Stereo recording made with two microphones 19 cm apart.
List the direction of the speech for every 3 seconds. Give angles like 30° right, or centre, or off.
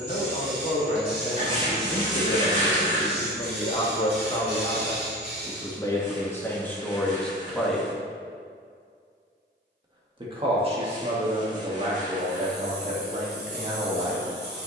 50° left, 30° left, 10° left, 30° right, 50° right.